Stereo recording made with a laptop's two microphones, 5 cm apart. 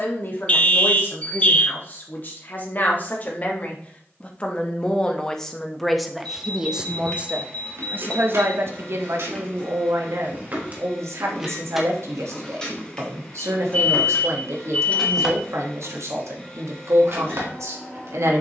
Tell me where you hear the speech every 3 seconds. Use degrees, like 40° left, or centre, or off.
40° left, 20° left, 30° right, 70° right, 70° right, 70° right.